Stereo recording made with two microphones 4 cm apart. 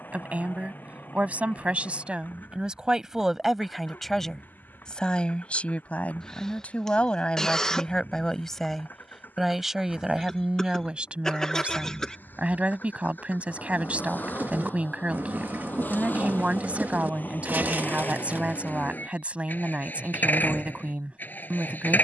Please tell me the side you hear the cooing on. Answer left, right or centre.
right.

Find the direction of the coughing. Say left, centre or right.
centre.